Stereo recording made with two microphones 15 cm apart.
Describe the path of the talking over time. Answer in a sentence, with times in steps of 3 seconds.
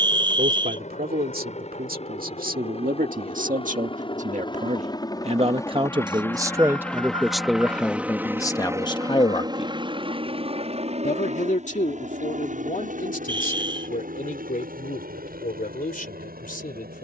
You can hear the talking on the right from 0 s, in the centre from 6 s and on the left from 9 s.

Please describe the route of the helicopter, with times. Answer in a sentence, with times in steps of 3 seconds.
You can hear the helicopter on the left from 0 s, in the centre from 6 s and on the right from 9 s.